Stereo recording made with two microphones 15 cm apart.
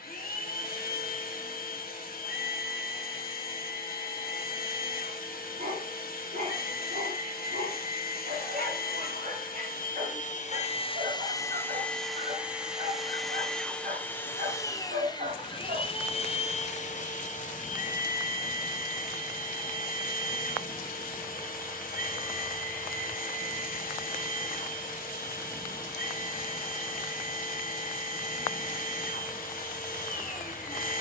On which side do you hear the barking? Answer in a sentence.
In this clip you hear the barking on the right.